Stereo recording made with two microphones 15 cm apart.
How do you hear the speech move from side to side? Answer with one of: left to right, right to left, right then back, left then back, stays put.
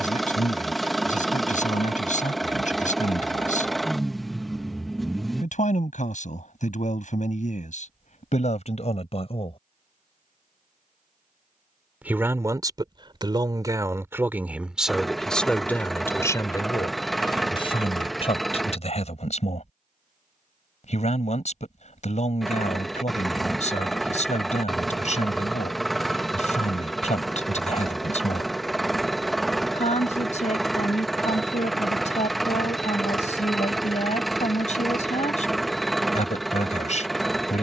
right then back.